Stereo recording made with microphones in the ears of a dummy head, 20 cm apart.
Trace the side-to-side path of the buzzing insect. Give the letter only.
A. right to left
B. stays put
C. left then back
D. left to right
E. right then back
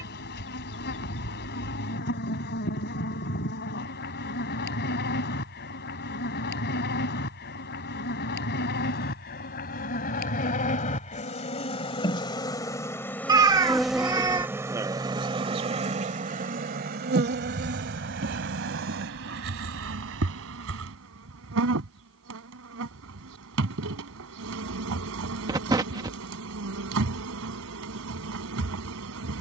D.